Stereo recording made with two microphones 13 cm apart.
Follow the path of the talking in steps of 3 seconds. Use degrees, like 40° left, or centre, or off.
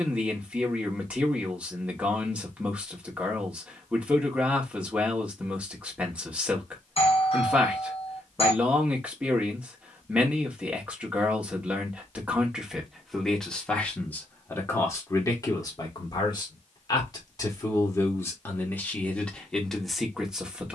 10° right, 10° right, 10° right, 10° right, 10° left, 30° left, 10° left.